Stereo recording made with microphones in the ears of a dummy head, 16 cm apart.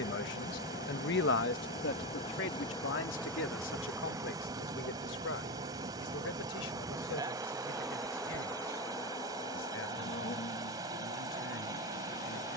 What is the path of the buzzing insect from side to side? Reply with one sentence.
In this clip you hear the buzzing insect go right and come back.